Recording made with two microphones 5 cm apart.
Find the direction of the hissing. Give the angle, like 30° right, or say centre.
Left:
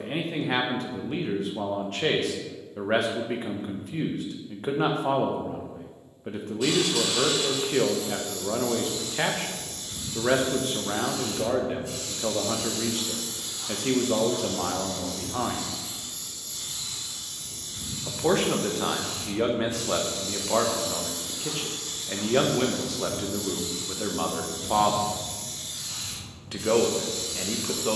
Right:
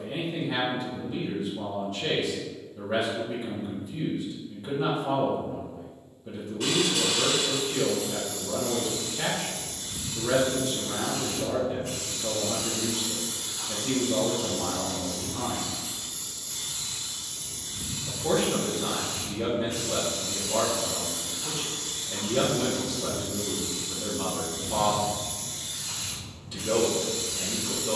60° right.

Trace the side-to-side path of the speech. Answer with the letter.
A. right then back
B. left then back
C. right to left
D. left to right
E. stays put
E.